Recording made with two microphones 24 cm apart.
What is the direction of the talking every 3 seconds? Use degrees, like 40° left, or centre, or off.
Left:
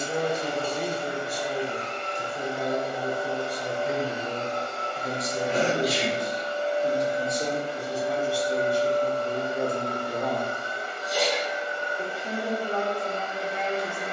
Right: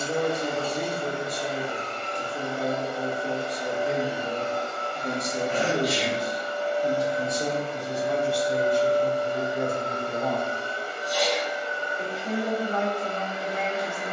40° right, 40° right, centre, 20° left, 30° left.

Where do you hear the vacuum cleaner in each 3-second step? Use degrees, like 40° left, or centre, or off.
40° right, centre, 10° left, 30° right, 40° right.